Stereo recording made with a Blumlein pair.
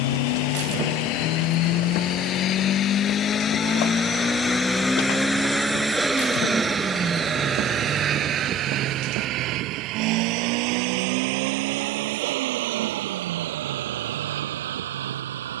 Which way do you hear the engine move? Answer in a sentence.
In this clip you hear the engine move to the right.